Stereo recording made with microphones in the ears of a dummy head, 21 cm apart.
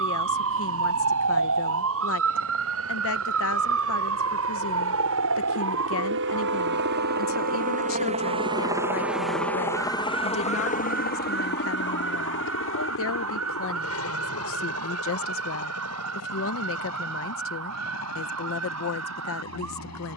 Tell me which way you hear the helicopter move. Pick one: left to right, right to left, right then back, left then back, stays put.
right to left.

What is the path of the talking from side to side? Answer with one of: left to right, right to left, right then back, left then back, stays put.
stays put.